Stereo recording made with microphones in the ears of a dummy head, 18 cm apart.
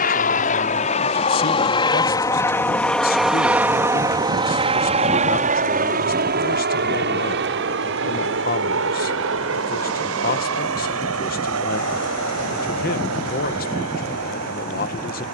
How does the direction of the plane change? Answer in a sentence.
You can hear the plane move from left to right.